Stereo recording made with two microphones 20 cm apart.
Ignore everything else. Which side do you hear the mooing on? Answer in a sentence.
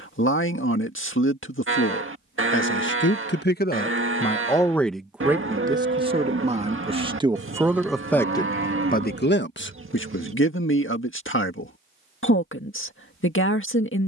You can hear the mooing on the right.